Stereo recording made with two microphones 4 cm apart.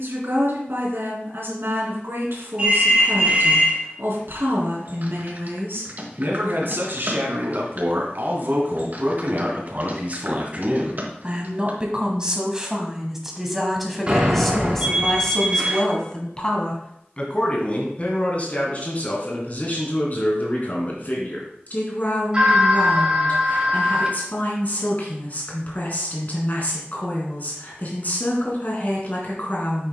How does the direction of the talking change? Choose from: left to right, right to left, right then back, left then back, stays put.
right to left.